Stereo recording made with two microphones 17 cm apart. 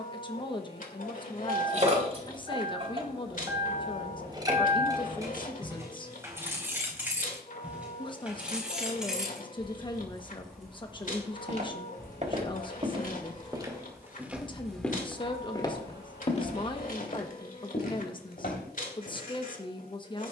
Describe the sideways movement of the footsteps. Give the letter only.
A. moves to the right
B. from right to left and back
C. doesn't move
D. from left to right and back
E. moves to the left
E.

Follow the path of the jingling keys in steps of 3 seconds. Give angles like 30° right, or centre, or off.
40° right, 20° right, 10° right, centre, centre, 30° right, off.